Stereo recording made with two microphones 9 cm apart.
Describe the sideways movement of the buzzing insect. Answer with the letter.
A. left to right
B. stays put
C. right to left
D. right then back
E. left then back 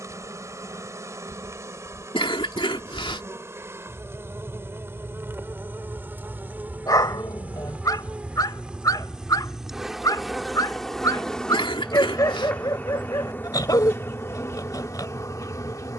C.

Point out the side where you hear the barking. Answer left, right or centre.
left.